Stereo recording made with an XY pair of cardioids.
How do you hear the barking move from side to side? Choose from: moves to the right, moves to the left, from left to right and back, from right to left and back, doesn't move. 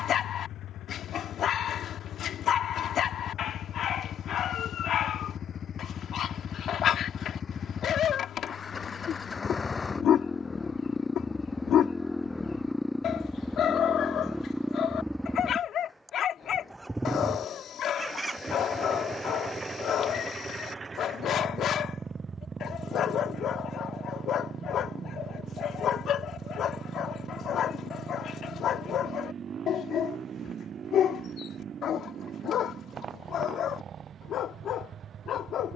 doesn't move.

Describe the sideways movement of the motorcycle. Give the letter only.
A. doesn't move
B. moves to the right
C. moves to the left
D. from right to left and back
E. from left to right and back
B.